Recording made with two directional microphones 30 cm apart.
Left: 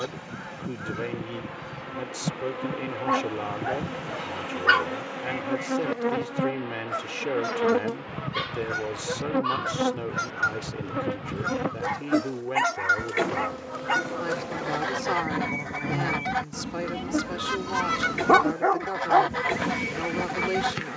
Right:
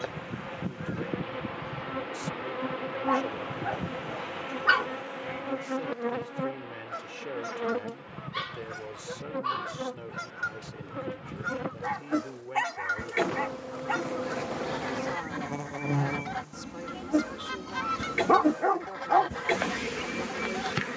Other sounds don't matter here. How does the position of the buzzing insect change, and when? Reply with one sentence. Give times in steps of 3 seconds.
You can hear the buzzing insect in the centre from 0 s, on the left from 6 s and in the centre from 12 s.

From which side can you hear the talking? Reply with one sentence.
In this clip you hear the talking on the left.